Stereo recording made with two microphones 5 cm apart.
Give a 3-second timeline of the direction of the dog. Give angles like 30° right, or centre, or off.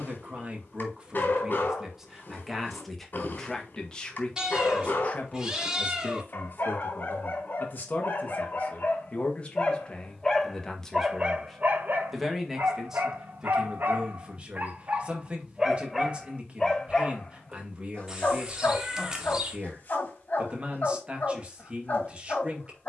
40° left, 40° left, 40° left, 10° right, 50° right, centre, 40° left, 40° left.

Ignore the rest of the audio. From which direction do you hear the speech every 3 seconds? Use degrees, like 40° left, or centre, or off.
10° right, 20° left, 40° left, 20° left, 10° right, 20° right, 20° right, 20° right.